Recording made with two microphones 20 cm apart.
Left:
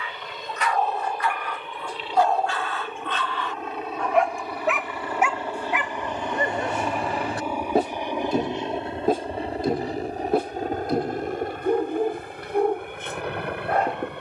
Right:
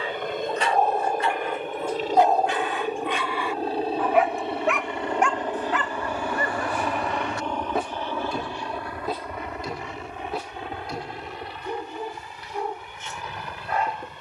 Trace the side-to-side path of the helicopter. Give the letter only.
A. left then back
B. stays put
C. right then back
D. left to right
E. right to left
E.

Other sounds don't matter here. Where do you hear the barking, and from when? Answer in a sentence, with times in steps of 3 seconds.
In this clip you hear the barking on the right from 0 s, in the centre from 3 s and on the left from 6 s.